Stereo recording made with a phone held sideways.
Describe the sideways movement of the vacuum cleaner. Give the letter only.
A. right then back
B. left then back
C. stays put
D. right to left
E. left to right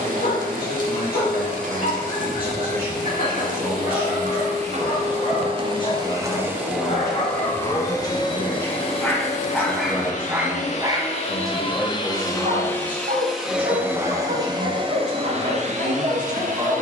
B.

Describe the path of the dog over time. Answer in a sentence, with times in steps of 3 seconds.
In this clip you hear the dog on the left from 0 s, in the centre from 9 s and on the right from 12 s.